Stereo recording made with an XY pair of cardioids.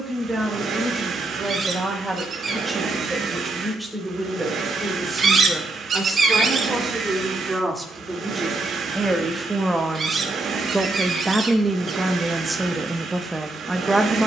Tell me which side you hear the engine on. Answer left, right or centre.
right.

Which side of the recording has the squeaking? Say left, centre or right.
right.